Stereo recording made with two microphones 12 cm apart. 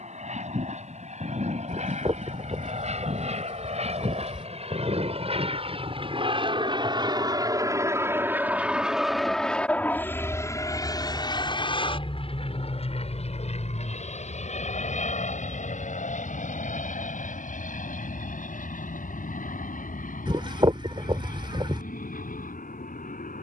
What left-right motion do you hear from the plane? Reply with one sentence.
In this clip you hear the plane go from the right side to the left.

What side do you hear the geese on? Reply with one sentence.
In this clip you hear the geese on the right.